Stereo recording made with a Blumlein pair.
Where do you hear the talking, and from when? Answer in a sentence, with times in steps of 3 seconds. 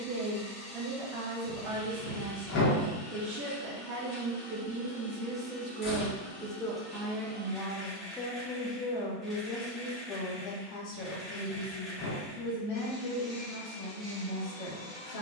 In this clip you hear the talking on the right from 0 s, in the centre from 6 s and on the left from 9 s.